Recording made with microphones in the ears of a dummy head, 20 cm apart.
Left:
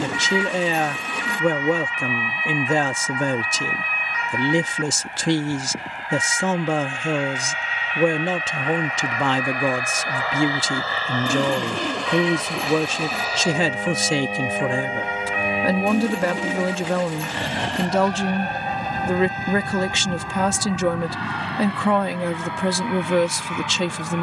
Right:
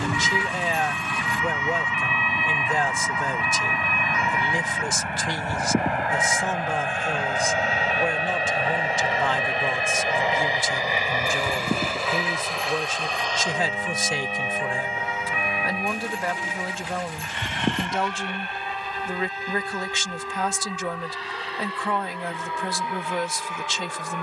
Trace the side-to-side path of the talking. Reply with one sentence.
You can hear the talking stay in one place.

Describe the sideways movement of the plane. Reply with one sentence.
You can hear the plane move to the left.